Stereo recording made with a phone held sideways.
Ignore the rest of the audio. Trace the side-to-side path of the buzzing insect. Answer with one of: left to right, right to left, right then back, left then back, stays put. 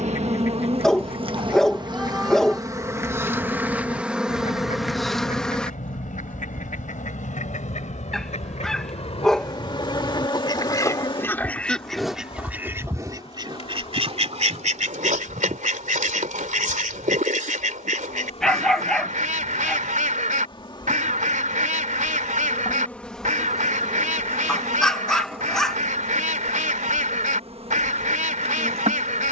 left then back.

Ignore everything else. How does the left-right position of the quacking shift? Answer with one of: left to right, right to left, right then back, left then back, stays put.
left to right.